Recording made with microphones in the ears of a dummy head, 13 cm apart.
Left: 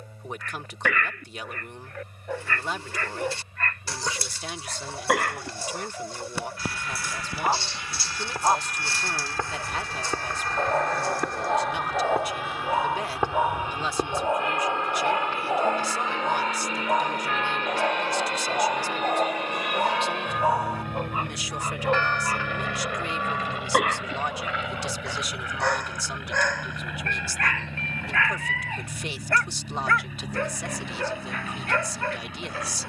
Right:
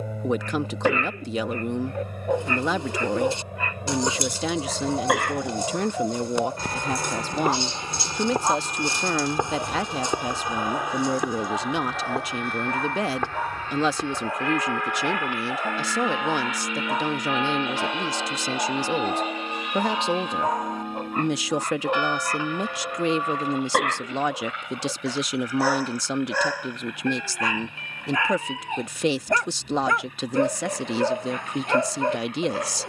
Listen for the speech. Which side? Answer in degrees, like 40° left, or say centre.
60° right.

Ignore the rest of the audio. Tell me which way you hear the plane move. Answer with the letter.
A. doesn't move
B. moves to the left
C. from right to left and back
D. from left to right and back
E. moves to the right
B.